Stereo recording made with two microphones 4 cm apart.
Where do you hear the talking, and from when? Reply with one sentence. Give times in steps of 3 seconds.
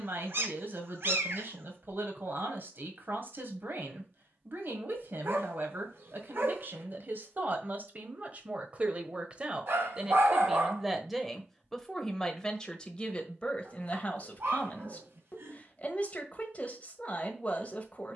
You can hear the talking on the right from 0 s, in the centre from 9 s and on the left from 12 s.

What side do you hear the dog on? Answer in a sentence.
You can hear the dog on the right.